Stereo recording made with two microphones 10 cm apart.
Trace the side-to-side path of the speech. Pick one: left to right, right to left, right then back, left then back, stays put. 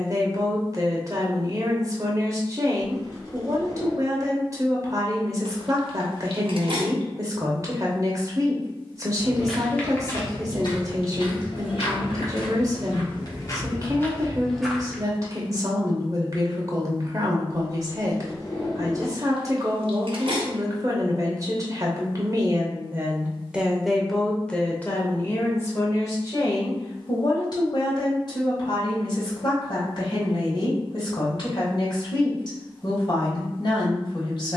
right to left.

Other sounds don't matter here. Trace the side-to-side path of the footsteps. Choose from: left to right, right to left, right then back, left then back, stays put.
left then back.